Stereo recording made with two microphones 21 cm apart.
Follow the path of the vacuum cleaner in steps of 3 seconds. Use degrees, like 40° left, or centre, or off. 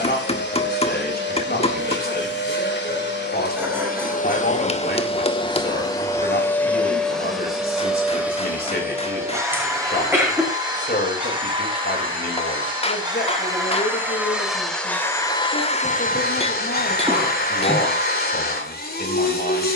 50° left, 40° left, centre, 20° right, 10° right, 40° left, 50° left.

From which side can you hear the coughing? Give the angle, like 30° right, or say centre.
10° right.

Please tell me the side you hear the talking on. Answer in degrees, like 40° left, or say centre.
50° left.